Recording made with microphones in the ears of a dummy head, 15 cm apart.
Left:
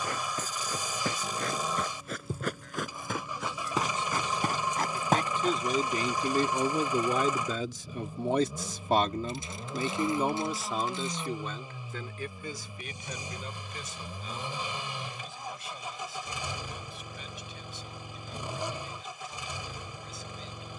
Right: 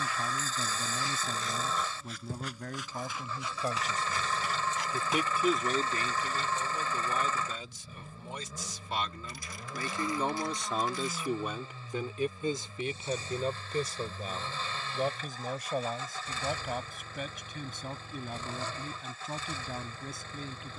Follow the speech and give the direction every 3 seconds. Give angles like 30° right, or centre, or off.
40° right, 20° right, 50° left, 10° left, 30° right, 40° right, 40° right.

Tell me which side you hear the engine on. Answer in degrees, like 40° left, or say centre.
10° left.